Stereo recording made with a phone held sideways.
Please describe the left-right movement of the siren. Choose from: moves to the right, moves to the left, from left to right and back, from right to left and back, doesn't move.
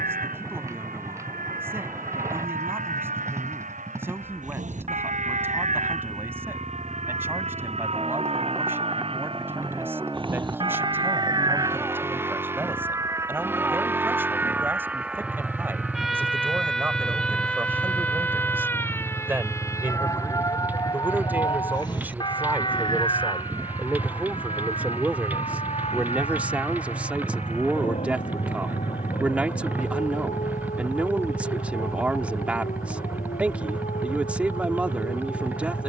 moves to the left.